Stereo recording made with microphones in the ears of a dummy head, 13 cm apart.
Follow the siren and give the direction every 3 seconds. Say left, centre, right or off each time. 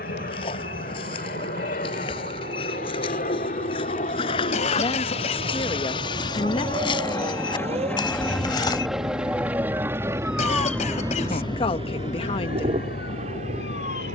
right, right, right, centre, left.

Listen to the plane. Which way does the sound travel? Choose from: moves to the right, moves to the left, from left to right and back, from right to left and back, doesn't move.
moves to the right.